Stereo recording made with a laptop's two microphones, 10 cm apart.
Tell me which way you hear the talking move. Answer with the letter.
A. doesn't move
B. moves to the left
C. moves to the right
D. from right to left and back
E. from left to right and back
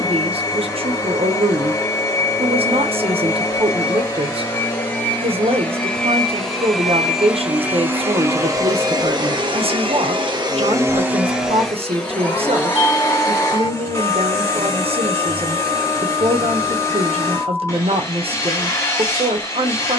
A.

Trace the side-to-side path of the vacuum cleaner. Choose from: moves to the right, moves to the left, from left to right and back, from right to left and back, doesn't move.
from left to right and back.